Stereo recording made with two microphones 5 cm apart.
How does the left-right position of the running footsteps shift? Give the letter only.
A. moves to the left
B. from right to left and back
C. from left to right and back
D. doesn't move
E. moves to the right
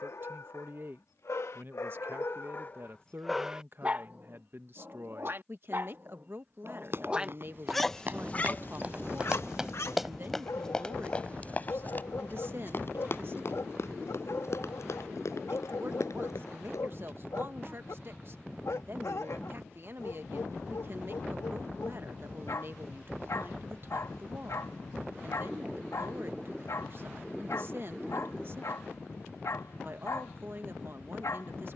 A.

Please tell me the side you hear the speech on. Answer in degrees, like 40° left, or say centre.
50° right.